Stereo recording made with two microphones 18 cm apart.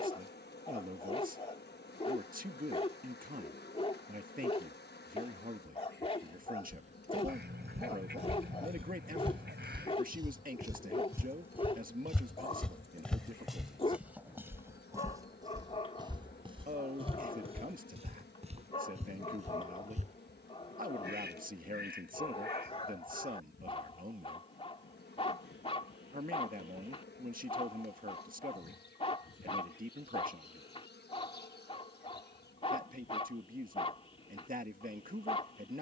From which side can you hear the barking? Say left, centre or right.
left.